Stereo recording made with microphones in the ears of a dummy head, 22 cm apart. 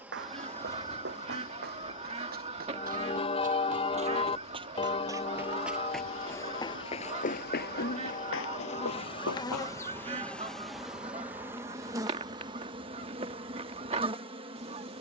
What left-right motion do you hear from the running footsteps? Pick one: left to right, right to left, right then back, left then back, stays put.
right to left.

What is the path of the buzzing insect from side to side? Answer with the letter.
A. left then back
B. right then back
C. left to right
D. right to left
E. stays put
A.